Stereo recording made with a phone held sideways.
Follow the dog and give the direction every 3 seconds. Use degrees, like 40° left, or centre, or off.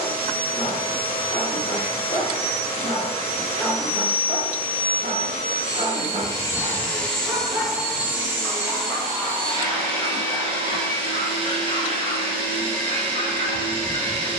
40° left, 20° right, 10° right, 30° left, 40° left.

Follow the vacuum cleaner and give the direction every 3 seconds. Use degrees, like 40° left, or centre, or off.
30° left, 30° left, centre, 30° right, 30° right.